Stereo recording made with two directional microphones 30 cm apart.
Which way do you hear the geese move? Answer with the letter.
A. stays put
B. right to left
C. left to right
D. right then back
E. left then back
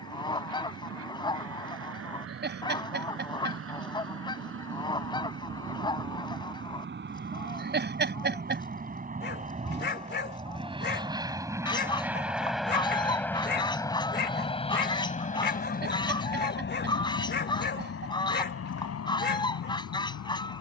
A.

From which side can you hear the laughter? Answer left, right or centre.
right.